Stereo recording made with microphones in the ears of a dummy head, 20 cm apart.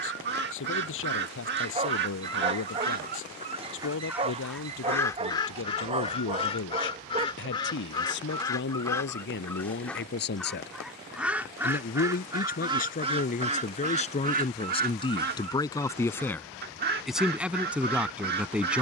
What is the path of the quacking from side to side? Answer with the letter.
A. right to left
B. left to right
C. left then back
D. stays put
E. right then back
C.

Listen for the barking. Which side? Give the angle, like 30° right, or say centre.
30° right.